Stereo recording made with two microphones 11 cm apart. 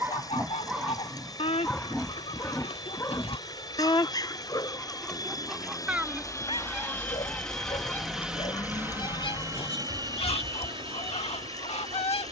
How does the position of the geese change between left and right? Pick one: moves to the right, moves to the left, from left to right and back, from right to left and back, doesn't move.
from left to right and back.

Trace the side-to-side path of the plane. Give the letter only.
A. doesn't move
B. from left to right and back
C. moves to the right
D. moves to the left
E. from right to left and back
C.